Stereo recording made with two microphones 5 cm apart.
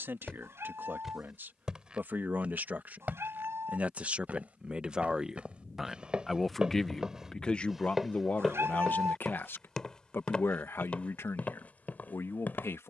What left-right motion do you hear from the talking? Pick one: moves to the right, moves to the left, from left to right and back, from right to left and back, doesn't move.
moves to the left.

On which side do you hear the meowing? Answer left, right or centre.
right.